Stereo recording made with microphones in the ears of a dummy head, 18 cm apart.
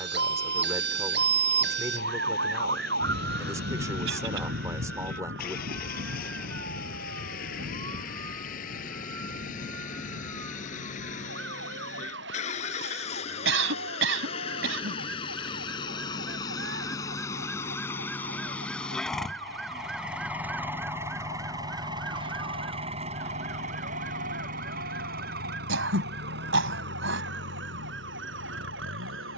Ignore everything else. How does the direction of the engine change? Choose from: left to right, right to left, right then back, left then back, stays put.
left to right.